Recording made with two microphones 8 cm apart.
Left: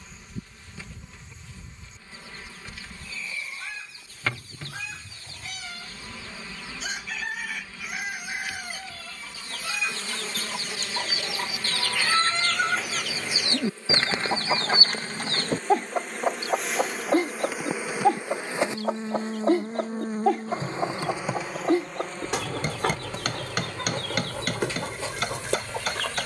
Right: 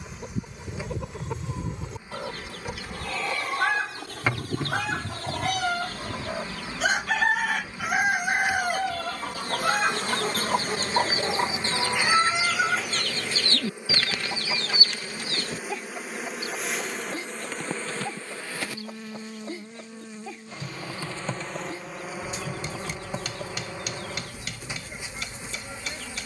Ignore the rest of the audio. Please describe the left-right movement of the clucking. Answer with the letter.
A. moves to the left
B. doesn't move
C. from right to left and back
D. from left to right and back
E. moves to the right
A.